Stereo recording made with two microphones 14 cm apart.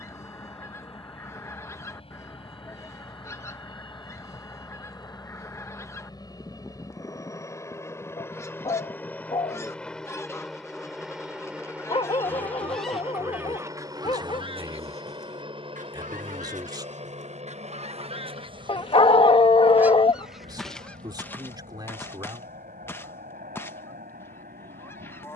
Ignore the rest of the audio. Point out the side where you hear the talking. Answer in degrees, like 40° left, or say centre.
30° right.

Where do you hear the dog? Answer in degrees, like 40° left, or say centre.
40° left.